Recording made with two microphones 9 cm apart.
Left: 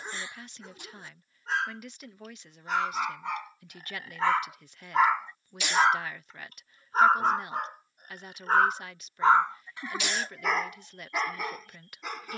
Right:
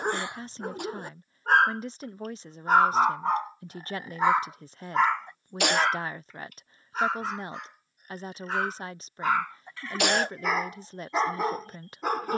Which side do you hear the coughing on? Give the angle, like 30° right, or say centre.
60° right.